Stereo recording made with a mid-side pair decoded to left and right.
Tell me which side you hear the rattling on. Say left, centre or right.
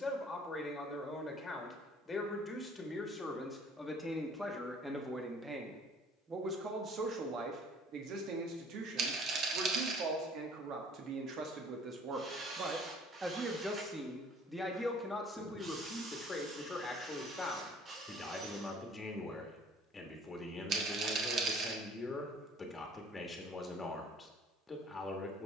right.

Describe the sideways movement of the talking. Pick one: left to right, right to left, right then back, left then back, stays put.
right then back.